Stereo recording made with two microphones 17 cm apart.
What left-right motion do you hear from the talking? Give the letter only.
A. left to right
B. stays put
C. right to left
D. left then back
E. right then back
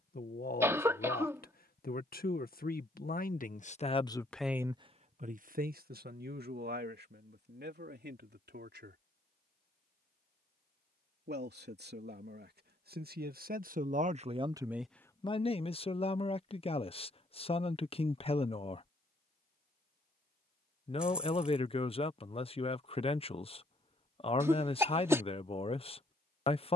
E.